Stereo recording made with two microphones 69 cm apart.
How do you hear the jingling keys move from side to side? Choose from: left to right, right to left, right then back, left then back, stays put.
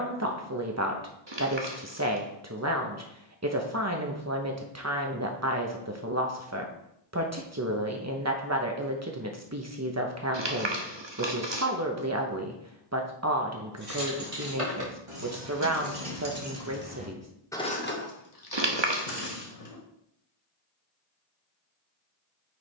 right to left.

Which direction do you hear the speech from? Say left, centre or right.
right.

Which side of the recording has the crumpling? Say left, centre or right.
right.